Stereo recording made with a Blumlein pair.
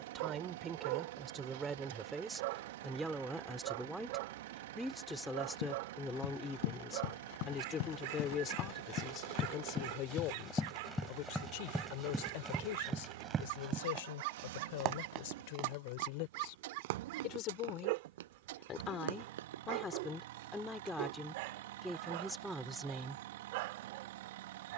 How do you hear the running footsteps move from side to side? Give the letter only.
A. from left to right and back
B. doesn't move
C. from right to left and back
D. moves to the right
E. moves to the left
D.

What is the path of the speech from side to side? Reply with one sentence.
In this clip you hear the speech move from right to left and back again.